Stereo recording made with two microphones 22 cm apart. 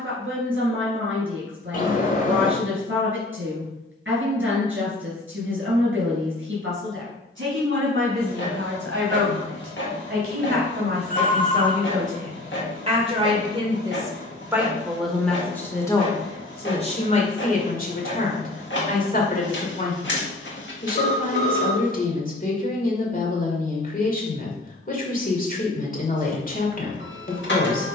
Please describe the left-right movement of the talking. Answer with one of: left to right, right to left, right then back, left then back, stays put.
right to left.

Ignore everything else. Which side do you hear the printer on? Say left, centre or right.
left.